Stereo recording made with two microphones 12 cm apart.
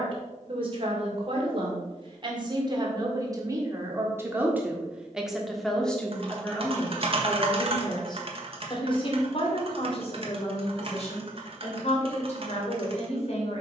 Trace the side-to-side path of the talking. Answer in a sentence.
In this clip you hear the talking move from right to left.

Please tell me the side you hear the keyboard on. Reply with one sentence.
In this clip you hear the keyboard on the right.